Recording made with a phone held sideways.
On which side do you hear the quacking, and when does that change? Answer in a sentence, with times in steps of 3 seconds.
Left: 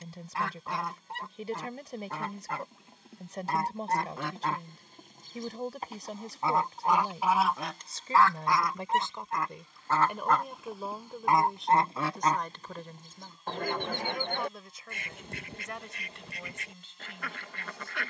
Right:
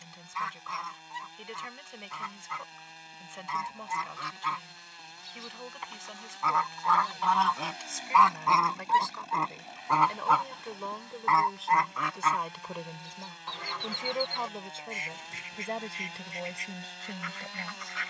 You can hear the quacking on the left from 0 s, in the centre from 6 s and on the left from 12 s.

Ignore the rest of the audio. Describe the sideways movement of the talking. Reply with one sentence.
You can hear the talking travel towards the right.